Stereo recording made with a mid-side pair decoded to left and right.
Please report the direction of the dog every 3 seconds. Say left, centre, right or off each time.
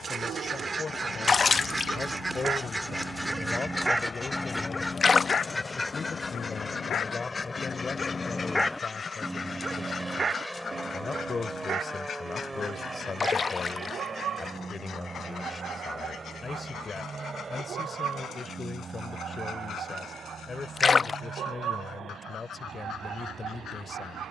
right, centre, left, right, right, right, right, right.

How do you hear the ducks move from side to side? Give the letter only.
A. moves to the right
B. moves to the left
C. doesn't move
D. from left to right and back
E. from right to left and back
B.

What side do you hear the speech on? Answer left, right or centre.
left.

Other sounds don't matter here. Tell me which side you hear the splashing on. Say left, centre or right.
left.